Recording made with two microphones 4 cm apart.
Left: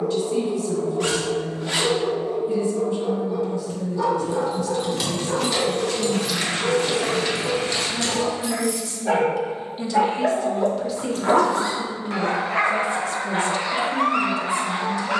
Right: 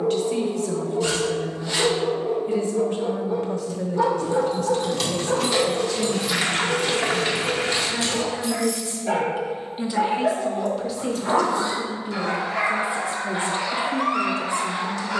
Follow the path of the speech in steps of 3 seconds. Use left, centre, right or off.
right, right, right, centre, right.